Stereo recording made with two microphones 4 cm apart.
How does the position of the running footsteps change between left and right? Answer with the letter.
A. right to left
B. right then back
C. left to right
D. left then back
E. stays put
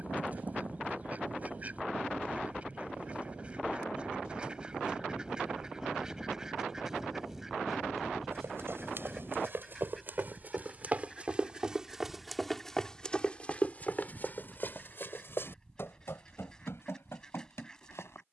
A.